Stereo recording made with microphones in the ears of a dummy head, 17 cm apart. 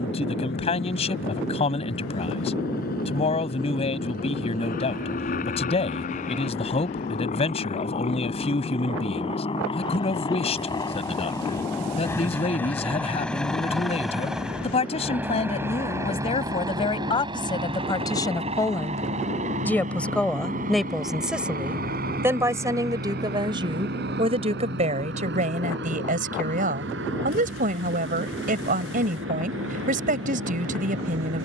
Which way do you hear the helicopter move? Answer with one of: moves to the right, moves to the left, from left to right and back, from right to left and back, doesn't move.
moves to the right.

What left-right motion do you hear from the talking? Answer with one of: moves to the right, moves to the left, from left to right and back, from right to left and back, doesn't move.
moves to the right.